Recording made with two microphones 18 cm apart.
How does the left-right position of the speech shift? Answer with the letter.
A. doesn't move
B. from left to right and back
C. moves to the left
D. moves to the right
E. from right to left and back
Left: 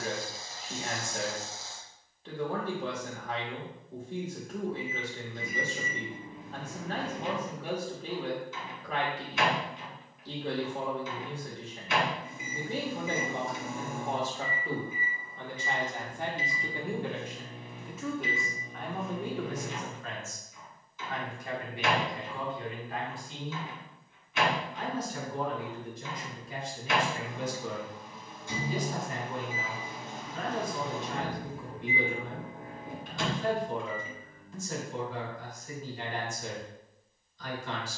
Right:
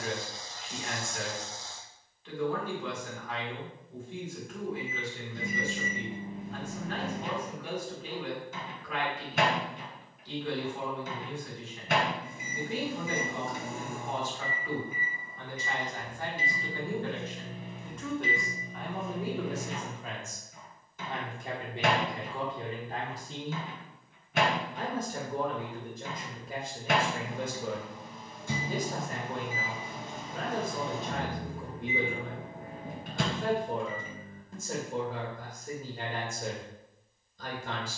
D.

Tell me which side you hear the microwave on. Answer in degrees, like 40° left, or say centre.
60° right.